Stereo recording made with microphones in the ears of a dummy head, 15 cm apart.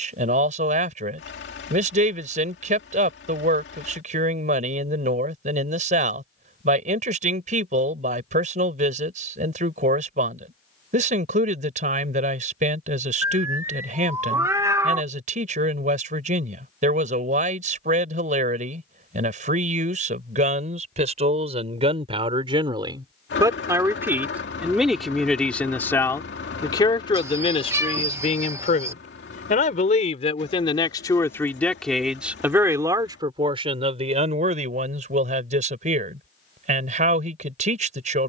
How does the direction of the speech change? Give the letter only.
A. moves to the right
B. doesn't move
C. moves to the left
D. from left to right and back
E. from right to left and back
E.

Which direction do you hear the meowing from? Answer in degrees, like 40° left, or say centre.
20° right.